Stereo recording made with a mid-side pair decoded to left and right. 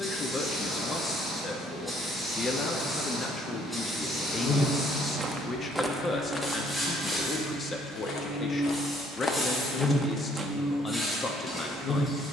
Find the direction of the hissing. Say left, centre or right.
centre.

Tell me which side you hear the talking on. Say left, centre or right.
left.